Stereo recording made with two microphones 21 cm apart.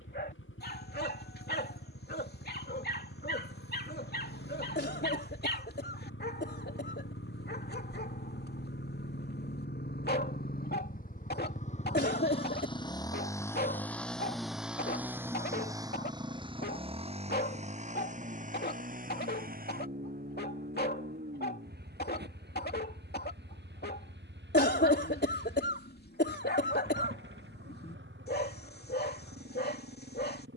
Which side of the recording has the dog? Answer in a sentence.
In this clip you hear the dog on the left.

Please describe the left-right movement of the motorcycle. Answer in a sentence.
You can hear the motorcycle go from the left side to the right.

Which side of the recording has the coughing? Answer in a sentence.
You can hear the coughing on the left.